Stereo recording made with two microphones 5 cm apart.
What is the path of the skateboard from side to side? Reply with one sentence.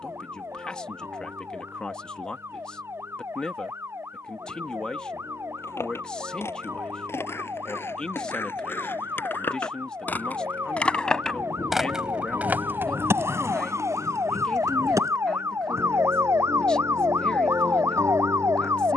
You can hear the skateboard move from left to right.